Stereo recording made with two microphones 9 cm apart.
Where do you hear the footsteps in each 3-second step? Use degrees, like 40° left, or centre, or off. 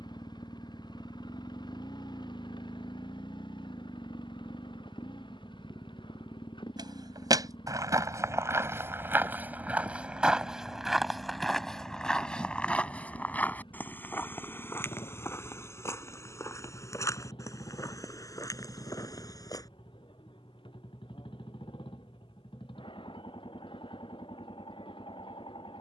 off, off, 30° right, 10° right, 20° left, 30° left, 40° left, off, off.